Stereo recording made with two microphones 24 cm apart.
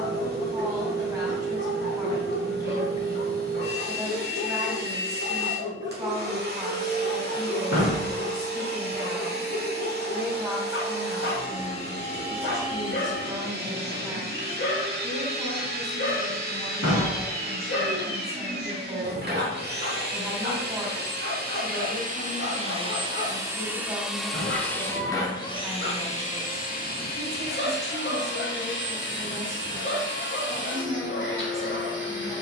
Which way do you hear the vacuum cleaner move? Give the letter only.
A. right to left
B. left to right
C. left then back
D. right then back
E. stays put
A.